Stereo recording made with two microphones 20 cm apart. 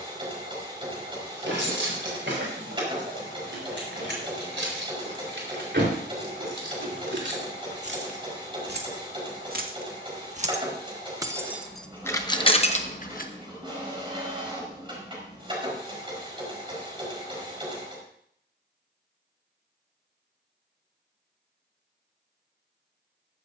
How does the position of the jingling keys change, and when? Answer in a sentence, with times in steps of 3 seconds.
In this clip you hear the jingling keys on the right from 0 s, on the left from 12 s and not at all from 15 s.